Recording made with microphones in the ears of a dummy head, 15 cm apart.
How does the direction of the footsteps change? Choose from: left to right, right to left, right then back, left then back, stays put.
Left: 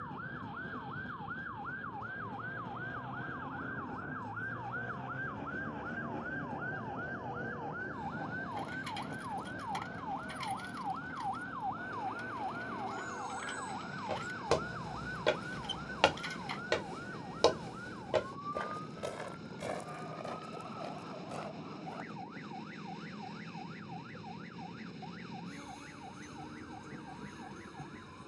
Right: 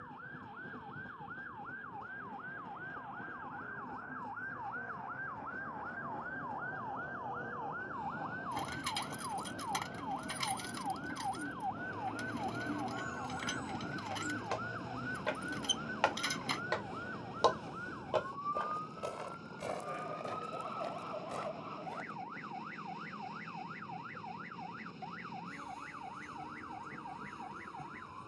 left to right.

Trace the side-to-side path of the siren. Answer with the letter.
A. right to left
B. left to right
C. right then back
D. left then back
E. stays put
B.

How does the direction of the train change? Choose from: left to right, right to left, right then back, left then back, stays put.
stays put.